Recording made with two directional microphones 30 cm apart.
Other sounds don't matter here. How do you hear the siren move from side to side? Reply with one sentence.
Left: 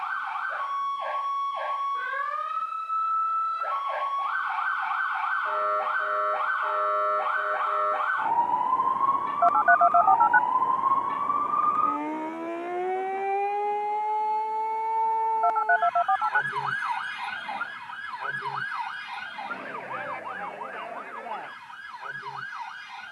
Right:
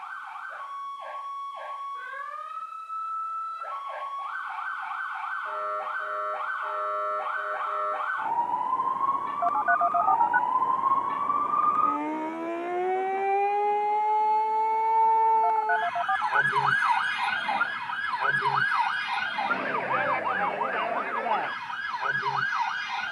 You can hear the siren go from the left side to the right.